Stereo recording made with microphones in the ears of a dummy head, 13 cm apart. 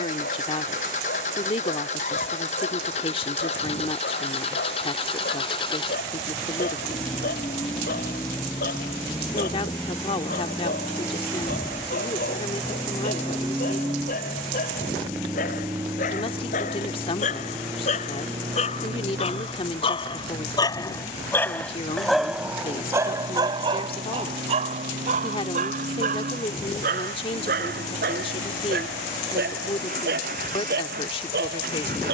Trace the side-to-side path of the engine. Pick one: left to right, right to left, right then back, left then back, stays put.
left to right.